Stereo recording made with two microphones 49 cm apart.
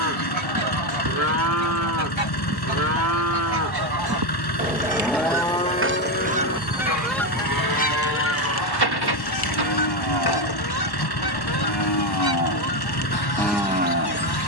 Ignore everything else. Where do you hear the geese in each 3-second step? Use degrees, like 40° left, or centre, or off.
60° right, 40° right, 10° left, 50° left, 50° left.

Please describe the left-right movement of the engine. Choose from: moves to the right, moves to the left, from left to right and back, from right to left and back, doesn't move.
doesn't move.